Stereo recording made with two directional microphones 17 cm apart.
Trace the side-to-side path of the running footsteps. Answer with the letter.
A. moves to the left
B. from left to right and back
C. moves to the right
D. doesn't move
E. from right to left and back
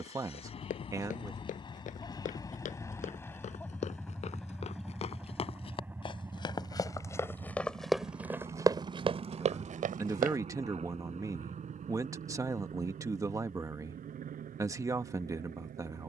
C.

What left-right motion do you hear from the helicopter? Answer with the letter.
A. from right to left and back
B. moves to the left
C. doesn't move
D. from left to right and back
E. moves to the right
E.